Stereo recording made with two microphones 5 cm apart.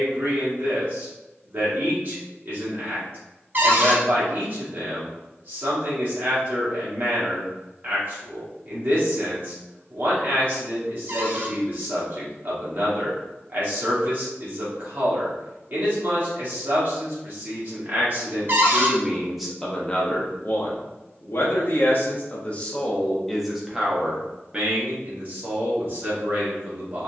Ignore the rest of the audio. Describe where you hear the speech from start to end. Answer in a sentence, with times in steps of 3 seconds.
You can hear the speech on the right from 0 s, in the centre from 18 s, on the left from 21 s and on the right from 24 s.